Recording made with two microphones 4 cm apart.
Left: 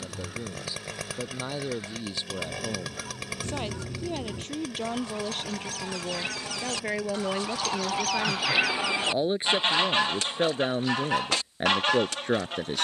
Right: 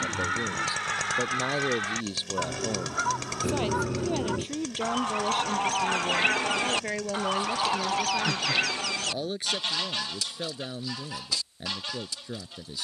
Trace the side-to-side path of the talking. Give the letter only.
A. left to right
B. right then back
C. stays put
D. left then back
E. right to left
E.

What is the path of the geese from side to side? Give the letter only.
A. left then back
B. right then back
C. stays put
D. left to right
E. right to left
E.